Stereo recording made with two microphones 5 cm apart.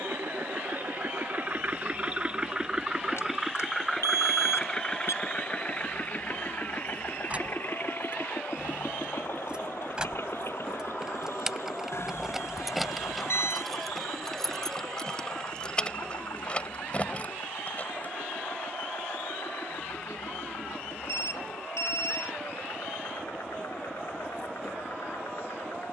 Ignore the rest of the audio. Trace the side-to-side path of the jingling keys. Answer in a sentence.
In this clip you hear the jingling keys travel towards the left.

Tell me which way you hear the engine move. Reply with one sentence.
In this clip you hear the engine move to the left.